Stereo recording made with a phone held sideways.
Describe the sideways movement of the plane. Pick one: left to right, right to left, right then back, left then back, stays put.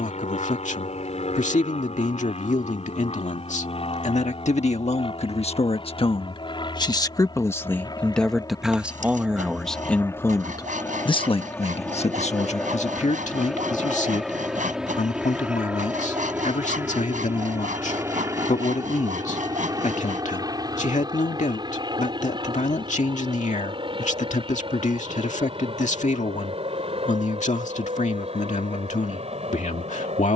left to right.